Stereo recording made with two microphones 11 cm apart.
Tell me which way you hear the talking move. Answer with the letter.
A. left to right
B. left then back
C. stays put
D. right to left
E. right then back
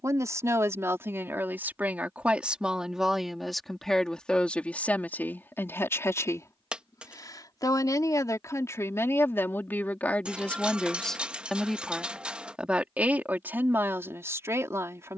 B.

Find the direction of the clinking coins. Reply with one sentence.
You can hear the clinking coins in the centre.